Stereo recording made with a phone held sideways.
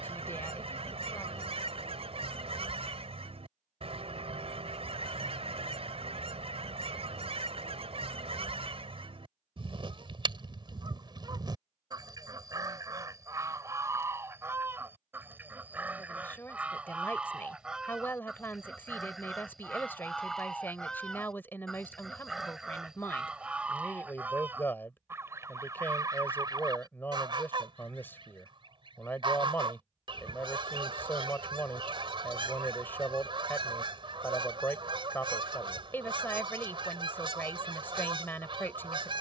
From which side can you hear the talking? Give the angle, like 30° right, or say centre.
10° left.